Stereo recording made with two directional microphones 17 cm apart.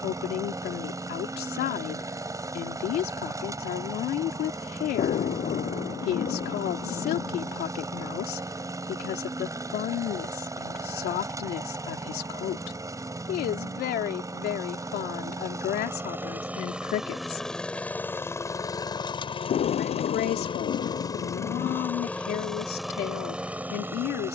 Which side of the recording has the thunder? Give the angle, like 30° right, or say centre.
50° left.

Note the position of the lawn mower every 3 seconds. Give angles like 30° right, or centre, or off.
20° right, 20° right, 20° right, 20° right, 20° right, 10° right, 30° left, centre.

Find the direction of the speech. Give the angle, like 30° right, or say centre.
70° left.